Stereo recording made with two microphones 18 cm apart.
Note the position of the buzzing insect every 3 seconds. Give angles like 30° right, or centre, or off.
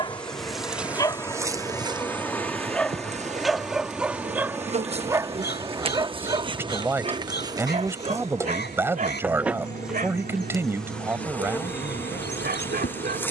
10° right, 30° right, 20° right, centre, 10° left.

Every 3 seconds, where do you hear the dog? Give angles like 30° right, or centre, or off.
20° left, 10° right, 40° right, 50° right, 60° right.